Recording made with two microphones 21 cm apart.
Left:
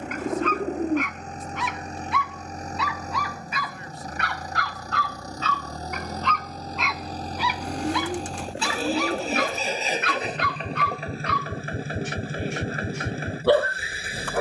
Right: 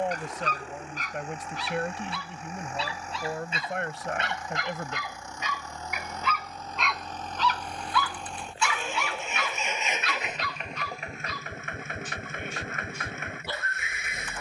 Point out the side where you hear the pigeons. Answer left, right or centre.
left.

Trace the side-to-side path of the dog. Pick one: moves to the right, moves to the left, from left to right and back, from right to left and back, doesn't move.
moves to the left.